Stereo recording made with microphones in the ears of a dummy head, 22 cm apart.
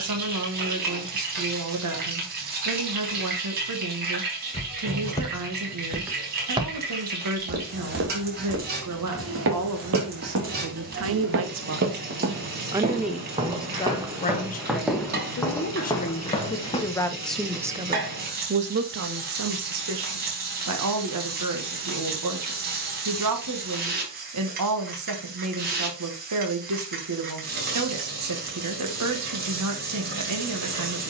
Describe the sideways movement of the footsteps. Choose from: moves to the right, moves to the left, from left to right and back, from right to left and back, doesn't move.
from left to right and back.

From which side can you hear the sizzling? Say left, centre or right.
right.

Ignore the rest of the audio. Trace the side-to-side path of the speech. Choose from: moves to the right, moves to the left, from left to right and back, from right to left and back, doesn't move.
from right to left and back.